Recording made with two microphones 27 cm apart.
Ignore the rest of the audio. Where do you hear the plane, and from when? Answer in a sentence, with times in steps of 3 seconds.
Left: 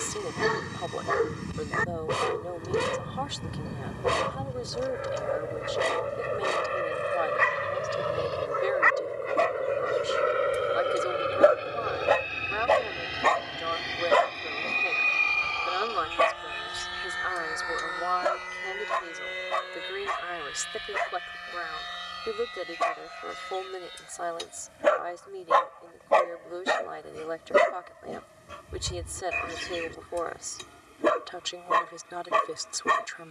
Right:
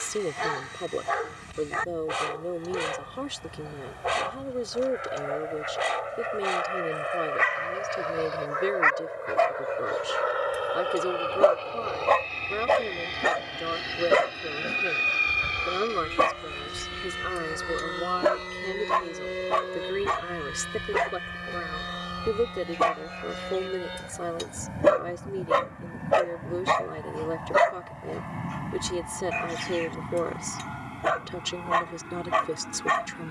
In this clip you hear the plane on the left from 0 s, in the centre from 12 s and on the right from 15 s.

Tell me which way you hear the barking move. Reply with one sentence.
In this clip you hear the barking move from left to right and back again.